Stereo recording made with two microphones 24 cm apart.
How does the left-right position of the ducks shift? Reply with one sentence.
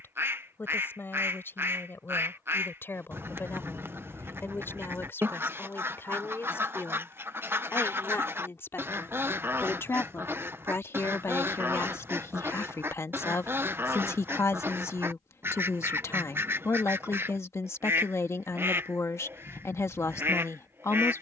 In this clip you hear the ducks stay in one place.